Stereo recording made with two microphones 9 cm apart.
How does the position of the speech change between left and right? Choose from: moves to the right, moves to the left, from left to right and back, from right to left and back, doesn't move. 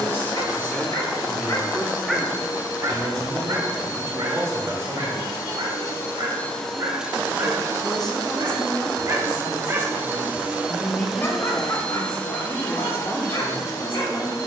from left to right and back.